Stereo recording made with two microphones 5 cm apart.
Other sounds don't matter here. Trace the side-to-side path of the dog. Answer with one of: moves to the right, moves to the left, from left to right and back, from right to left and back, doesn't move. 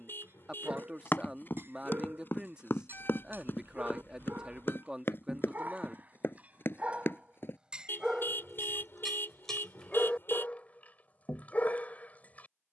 moves to the left.